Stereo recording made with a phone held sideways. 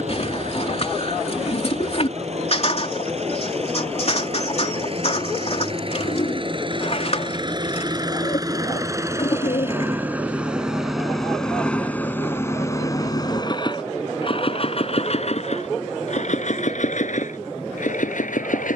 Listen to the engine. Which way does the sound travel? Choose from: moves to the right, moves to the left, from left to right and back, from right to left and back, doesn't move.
moves to the left.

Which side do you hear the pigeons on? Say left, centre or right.
left.